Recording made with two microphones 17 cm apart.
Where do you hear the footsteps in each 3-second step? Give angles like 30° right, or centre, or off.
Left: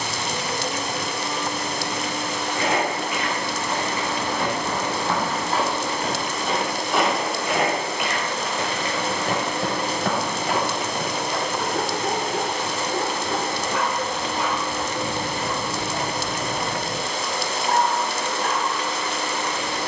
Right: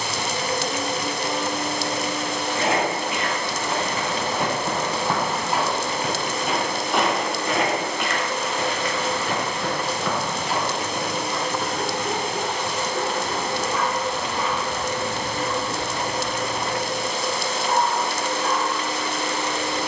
30° right, 20° right, 10° left, 50° left, off, off, off.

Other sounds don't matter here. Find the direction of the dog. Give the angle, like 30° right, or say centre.
60° left.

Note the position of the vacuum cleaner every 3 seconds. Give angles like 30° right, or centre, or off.
30° right, 30° right, 10° right, 40° left, 40° left, centre, 20° right.